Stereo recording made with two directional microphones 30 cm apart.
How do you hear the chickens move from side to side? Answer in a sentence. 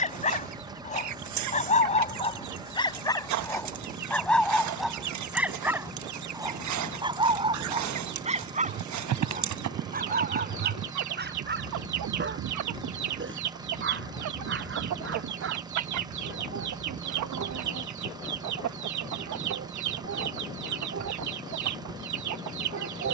In this clip you hear the chickens stay in one place.